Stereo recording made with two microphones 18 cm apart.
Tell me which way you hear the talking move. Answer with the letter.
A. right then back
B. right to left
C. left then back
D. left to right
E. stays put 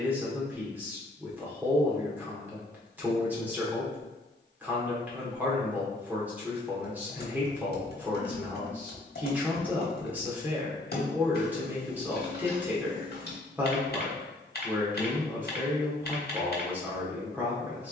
E.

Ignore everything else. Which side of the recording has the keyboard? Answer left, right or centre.
left.